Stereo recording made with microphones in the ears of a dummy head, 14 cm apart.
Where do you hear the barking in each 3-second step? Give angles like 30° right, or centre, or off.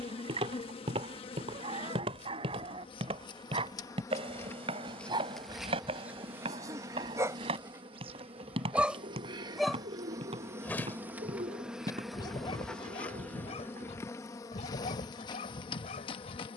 40° right, 30° right, 20° right, 10° left, 40° left, 50° left.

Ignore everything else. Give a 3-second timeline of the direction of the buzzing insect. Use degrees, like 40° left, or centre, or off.
40° left, 10° left, 30° right, 20° right, 10° left, 30° left.